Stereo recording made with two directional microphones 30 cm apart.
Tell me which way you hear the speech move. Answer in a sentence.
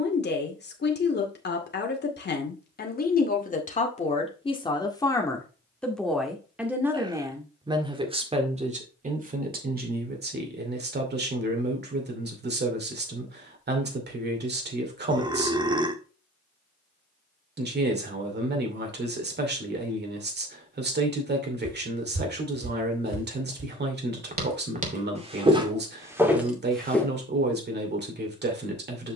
In this clip you hear the speech go from the left side to the right.